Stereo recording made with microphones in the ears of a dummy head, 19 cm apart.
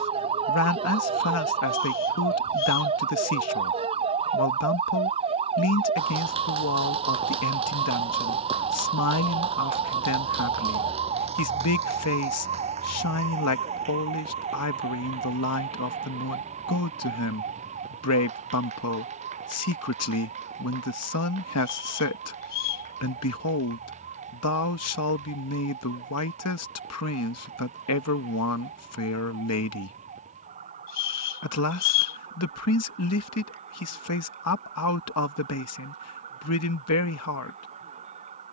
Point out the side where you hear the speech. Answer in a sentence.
In this clip you hear the speech on the left.